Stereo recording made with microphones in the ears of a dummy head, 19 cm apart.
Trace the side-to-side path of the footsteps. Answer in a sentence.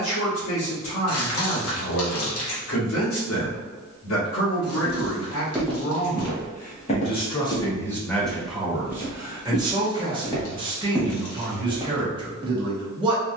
In this clip you hear the footsteps move from right to left and back again.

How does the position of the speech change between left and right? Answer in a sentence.
You can hear the speech move to the right.